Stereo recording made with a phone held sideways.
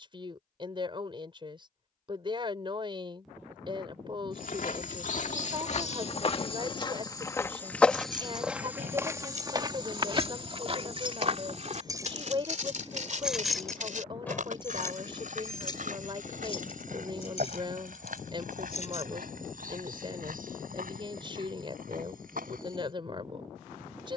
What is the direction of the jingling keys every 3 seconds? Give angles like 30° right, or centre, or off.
off, off, 60° right, 40° right, centre, 40° left, 50° left, off.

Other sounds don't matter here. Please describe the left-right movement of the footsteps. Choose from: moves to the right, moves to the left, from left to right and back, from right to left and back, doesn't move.
moves to the right.